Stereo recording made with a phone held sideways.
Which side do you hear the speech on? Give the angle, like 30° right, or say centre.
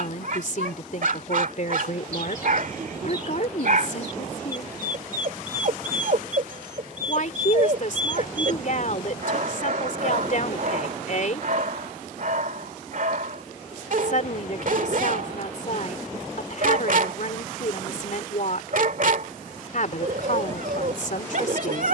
60° left.